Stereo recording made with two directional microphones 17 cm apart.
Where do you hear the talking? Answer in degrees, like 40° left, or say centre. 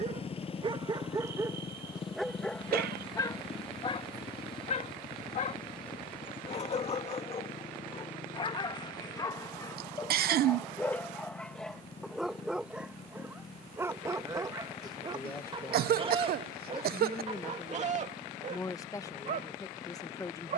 20° left.